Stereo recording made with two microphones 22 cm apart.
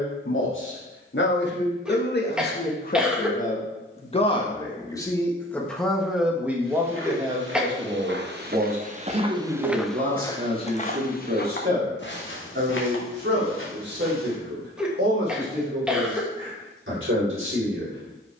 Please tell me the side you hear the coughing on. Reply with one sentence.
You can hear the coughing in the centre.